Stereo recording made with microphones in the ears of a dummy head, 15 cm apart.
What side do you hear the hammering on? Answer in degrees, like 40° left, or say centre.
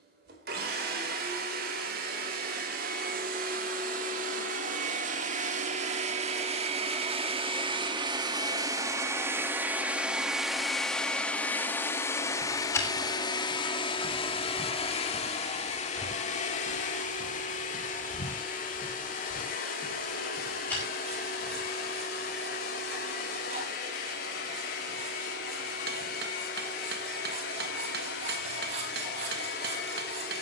60° right.